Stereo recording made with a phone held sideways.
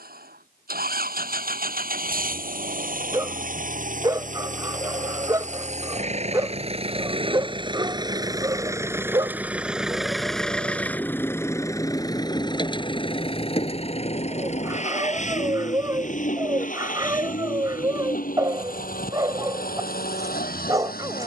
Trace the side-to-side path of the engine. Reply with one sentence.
You can hear the engine travel towards the left.